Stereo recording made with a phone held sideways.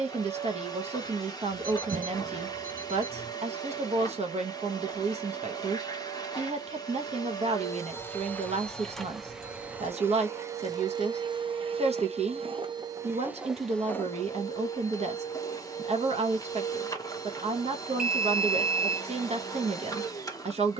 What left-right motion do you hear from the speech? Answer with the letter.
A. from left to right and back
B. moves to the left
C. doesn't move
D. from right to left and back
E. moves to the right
C.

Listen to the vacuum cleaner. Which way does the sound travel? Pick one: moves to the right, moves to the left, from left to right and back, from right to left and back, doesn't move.
from left to right and back.